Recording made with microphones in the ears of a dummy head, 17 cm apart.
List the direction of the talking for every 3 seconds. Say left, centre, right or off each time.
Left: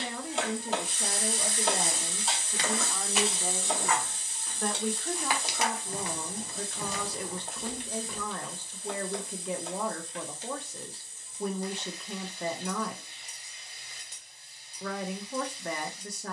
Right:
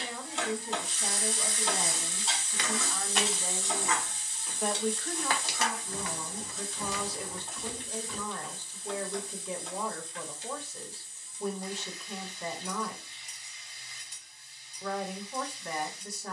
left, centre, left, left, left, left.